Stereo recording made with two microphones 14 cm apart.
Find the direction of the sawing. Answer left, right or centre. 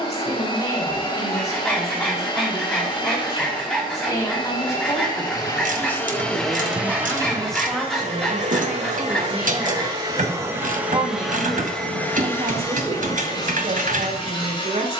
centre.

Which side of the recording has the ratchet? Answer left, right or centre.
right.